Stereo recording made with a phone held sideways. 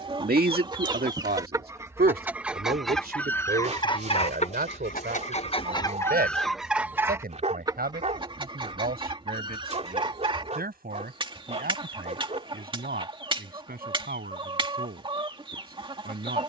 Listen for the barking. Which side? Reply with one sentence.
You can hear the barking on the right.